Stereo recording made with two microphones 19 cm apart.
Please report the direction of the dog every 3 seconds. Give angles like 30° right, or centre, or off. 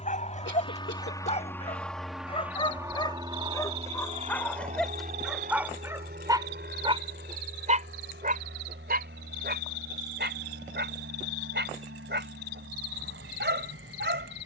30° left, centre, 40° right, 60° right, 70° right.